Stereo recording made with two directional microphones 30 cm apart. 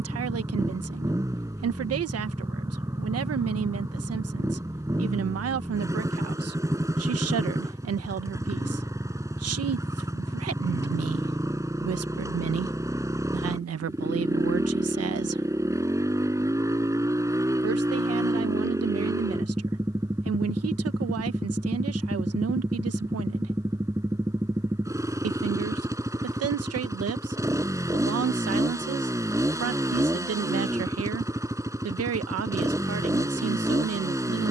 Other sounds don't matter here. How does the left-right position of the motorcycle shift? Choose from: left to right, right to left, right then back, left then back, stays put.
stays put.